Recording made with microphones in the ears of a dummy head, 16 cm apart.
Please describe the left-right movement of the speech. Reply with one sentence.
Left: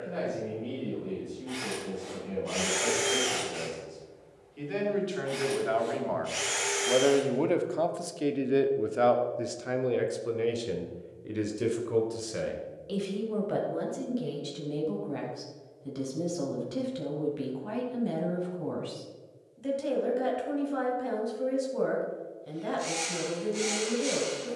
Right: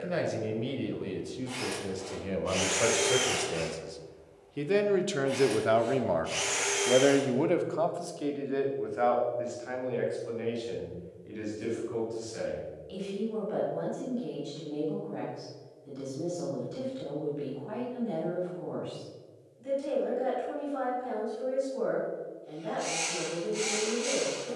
You can hear the speech go from the right side to the left.